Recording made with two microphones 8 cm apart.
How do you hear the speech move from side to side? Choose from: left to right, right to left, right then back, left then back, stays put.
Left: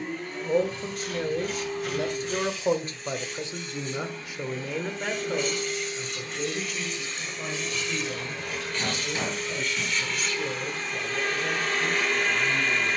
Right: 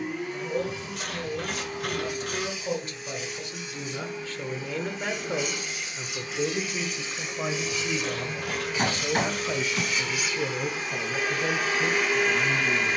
left to right.